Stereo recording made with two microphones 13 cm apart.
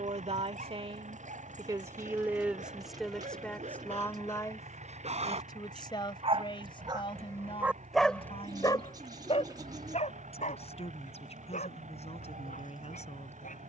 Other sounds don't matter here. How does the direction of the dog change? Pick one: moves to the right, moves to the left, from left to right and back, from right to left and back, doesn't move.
moves to the left.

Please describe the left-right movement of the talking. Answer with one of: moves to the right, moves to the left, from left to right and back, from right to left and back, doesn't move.
moves to the left.